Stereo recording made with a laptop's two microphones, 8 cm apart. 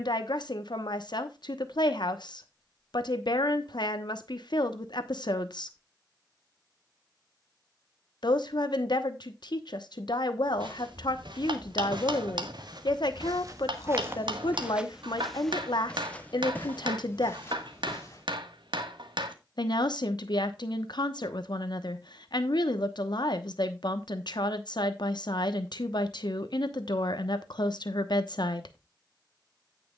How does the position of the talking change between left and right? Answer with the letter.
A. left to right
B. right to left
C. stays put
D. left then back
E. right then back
C.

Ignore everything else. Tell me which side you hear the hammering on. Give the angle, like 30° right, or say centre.
80° right.